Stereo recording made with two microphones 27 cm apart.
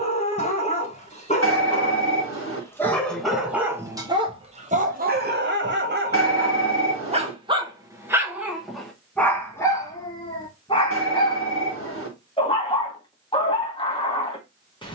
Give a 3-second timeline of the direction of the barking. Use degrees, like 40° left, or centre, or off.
20° left, 20° right, 20° right, 10° left, 20° left.